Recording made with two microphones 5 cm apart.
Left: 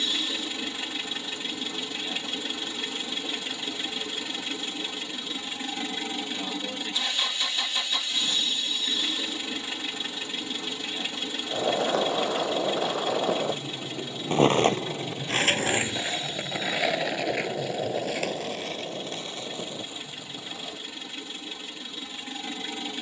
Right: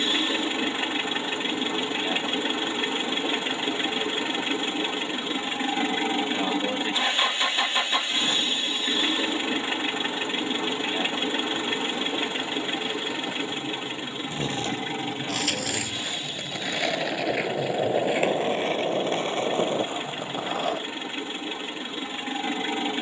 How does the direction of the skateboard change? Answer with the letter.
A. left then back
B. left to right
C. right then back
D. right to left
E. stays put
B.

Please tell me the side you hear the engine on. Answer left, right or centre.
right.